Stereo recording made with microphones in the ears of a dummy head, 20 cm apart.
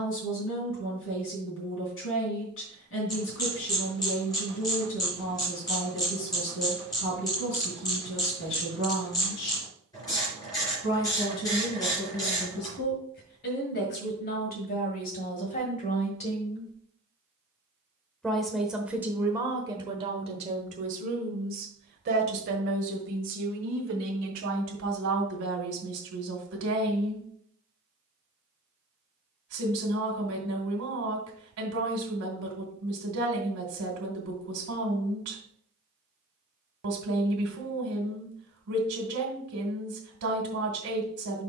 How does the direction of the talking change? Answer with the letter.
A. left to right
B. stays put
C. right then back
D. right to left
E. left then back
A.